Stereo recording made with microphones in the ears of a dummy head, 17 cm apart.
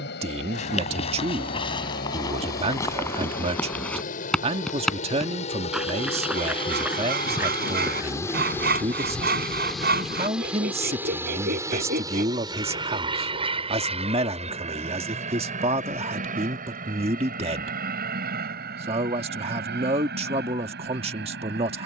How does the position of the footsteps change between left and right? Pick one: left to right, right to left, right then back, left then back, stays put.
left to right.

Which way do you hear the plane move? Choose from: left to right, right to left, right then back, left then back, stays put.
left to right.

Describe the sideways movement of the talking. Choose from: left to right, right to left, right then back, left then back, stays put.
stays put.